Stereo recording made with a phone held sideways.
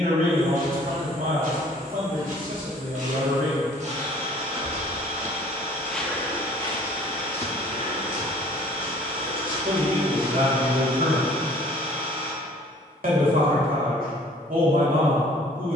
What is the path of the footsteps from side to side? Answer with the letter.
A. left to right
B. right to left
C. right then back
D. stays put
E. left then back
B.